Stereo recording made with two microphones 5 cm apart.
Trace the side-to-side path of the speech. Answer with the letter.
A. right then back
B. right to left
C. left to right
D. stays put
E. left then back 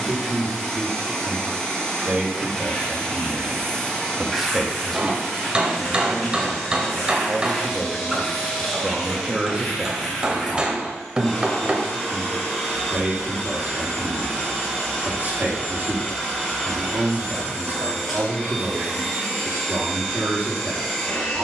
E.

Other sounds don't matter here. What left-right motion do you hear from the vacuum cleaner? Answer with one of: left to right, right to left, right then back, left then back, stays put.
stays put.